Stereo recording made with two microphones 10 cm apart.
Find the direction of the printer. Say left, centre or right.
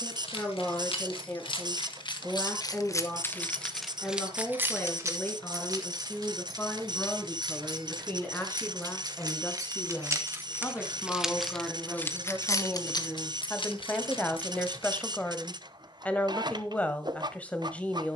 right.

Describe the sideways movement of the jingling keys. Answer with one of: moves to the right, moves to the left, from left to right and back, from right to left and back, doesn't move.
from left to right and back.